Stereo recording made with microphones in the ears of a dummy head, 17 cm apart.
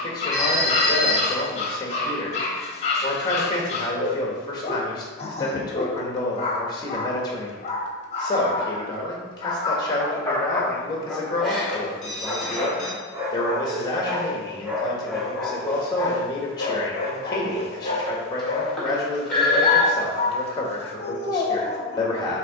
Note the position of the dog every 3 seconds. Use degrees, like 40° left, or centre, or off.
30° left, 30° left, 30° left, 10° left, 10° right, 20° left, 30° left, 30° left.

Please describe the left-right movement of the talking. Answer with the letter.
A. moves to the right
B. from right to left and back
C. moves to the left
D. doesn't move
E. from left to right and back
D.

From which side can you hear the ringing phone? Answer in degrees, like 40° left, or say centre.
centre.